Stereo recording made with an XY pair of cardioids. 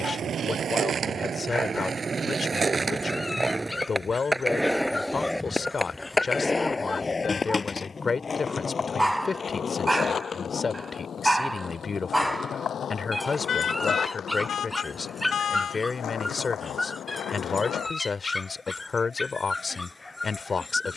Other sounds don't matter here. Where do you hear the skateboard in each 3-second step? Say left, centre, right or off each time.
right, centre, left, left, left, left, off.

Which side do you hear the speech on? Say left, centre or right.
left.